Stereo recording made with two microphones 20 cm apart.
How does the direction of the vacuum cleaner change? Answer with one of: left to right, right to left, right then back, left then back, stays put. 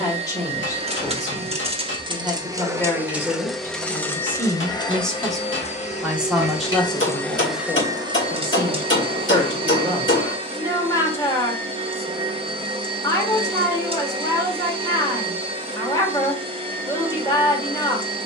left then back.